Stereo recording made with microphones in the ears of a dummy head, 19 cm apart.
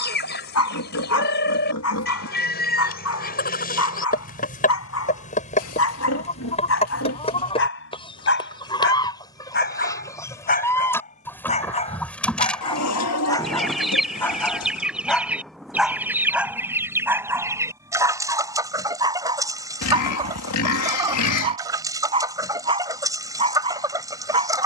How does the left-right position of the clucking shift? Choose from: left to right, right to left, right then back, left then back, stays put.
left to right.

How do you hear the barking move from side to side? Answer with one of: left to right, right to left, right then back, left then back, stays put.
left to right.